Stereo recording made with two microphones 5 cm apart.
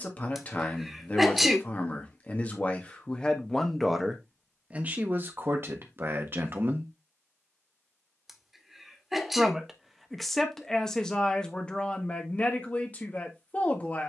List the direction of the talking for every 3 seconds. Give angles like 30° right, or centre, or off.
30° left, 20° right, 40° right, 10° left, 30° left.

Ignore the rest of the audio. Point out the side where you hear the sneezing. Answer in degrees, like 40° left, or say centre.
centre.